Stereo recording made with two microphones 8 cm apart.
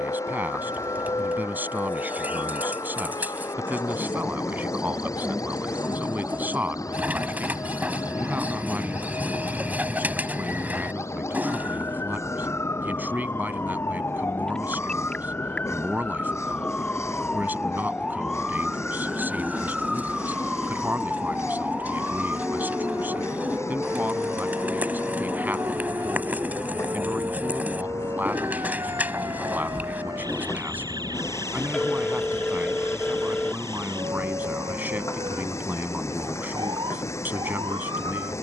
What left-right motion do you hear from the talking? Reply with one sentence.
You can hear the talking stay put.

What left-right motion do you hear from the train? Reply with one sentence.
You can hear the train stay in one place.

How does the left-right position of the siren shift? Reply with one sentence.
In this clip you hear the siren move to the right.